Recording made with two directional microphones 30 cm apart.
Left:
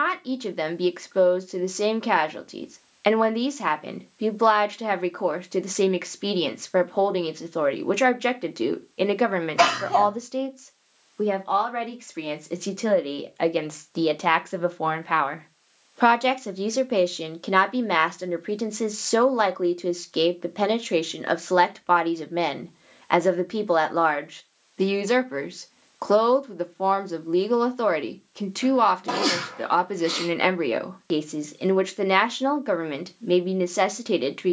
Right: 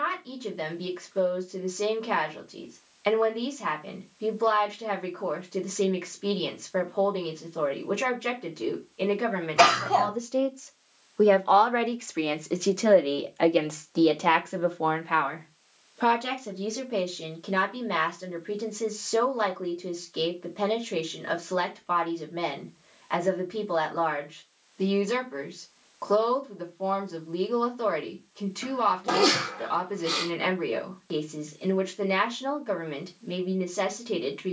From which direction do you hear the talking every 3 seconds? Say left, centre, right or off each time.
left, left, left, centre, centre, left, left, left, left, left, left, left.